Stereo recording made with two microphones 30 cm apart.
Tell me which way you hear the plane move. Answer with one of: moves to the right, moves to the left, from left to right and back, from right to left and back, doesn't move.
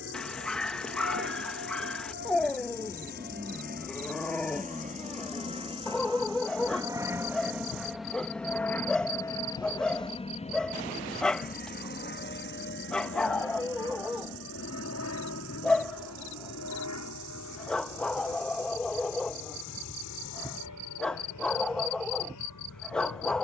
moves to the left.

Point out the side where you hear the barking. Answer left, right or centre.
centre.